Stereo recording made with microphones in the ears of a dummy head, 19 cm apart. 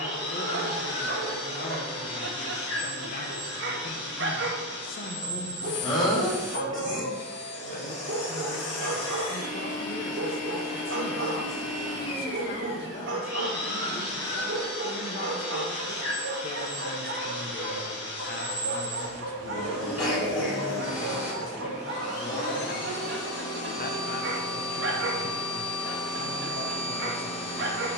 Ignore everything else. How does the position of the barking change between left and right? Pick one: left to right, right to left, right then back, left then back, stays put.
stays put.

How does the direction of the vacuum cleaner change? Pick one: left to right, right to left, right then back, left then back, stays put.
stays put.